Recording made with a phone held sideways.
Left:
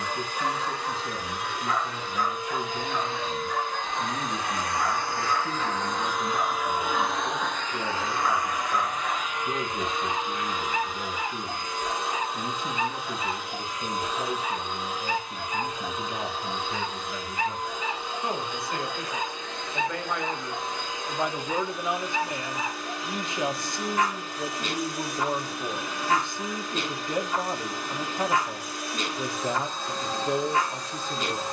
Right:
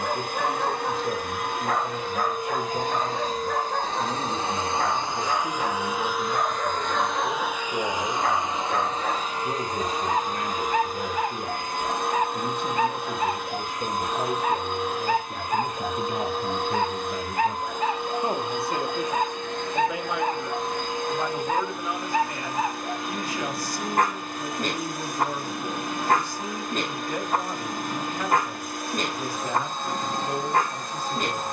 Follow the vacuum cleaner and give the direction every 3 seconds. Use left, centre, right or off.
right, right, centre, right, right, right, right, right, right, right, right.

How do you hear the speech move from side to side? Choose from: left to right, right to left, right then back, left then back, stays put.
right to left.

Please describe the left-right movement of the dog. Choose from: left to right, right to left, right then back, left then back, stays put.
stays put.